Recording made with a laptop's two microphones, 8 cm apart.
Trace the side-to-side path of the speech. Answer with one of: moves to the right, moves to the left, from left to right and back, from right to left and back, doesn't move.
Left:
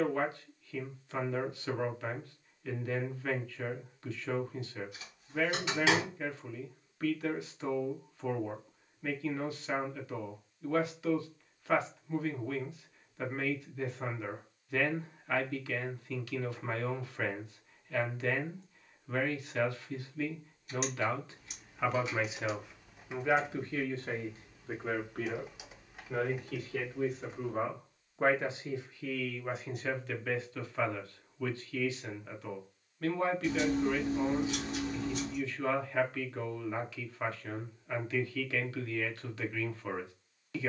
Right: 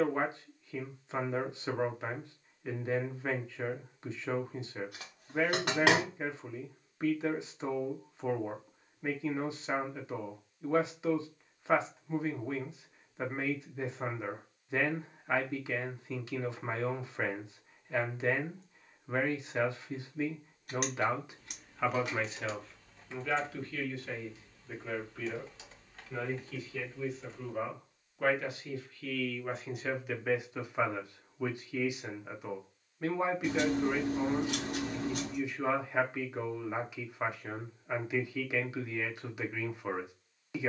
from right to left and back.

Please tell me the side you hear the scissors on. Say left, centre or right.
right.